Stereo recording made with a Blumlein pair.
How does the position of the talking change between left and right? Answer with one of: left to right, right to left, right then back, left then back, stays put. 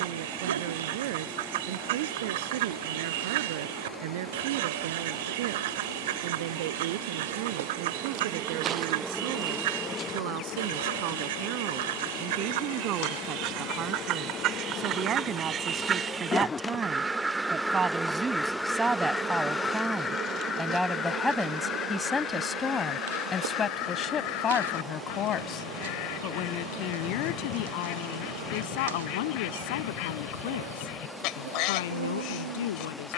right to left.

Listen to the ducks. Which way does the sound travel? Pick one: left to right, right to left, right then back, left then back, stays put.
right to left.